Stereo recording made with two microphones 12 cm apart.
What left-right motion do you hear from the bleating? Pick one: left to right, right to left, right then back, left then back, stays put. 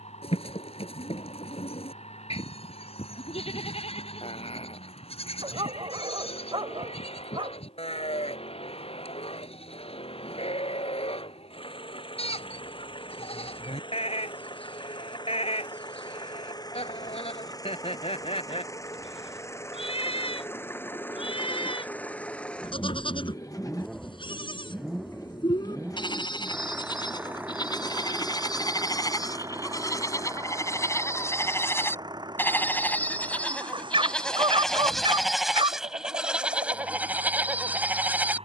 left to right.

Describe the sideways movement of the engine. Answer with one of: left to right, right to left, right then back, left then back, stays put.
left to right.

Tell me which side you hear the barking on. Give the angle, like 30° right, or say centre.
50° right.